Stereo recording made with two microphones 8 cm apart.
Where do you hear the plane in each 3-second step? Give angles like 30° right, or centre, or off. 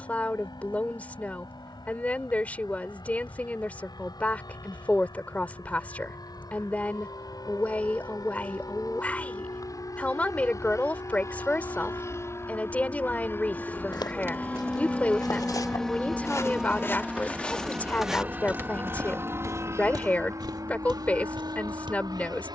60° left, 60° left, 50° left, 40° left, 20° left, centre, 30° right, 50° right.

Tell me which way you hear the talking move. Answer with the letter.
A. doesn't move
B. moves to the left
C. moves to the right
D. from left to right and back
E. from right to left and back
A.